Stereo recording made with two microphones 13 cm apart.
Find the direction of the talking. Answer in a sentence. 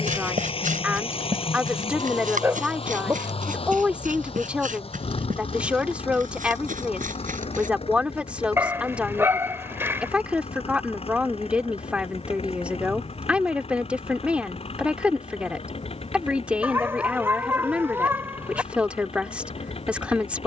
You can hear the talking in the centre.